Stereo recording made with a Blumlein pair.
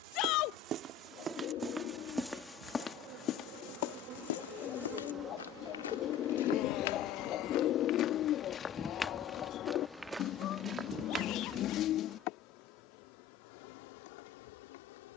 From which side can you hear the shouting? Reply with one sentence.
You can hear the shouting on the left.